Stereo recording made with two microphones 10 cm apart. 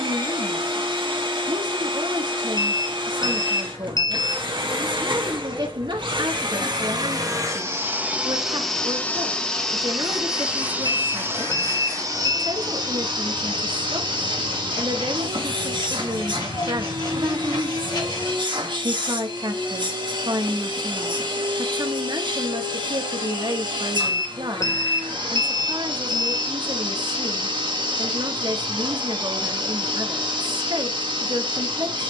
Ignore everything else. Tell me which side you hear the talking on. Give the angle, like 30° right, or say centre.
50° right.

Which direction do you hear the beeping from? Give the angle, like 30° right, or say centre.
30° left.